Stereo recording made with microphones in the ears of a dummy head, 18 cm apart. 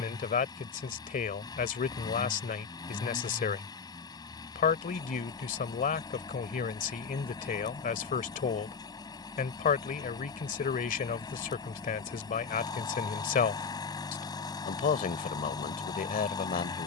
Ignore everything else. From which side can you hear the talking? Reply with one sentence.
You can hear the talking on the left.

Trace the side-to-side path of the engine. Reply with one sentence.
You can hear the engine stay put.